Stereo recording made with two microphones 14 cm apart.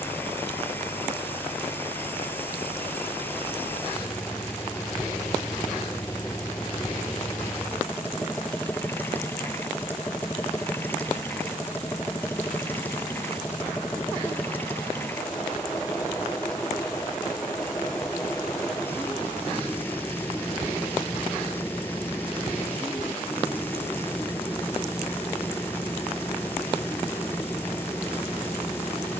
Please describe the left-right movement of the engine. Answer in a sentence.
In this clip you hear the engine stay in one place.